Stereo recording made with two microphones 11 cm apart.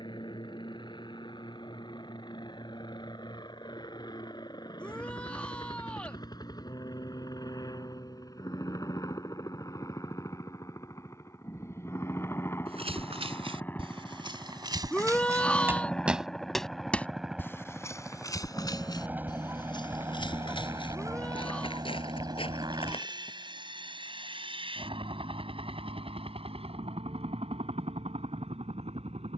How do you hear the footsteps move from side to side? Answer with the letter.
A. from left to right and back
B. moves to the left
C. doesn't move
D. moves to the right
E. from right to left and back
B.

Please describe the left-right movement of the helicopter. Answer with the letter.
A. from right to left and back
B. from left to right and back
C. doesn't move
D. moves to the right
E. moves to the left
D.